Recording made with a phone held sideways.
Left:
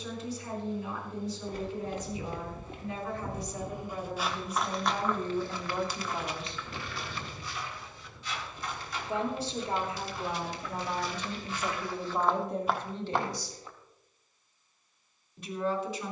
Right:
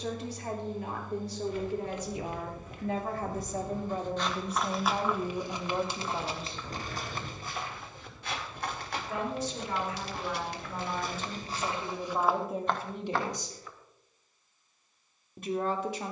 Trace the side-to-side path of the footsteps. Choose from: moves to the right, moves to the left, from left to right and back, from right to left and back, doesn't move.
from left to right and back.